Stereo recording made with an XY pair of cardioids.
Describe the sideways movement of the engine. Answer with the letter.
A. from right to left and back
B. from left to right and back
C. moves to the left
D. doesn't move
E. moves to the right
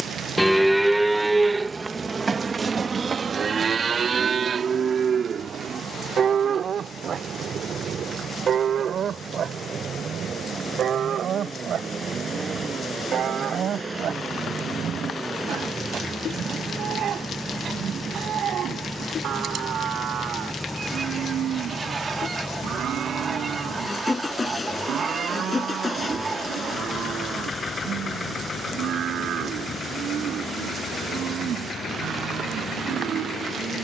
C.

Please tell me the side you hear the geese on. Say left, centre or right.
right.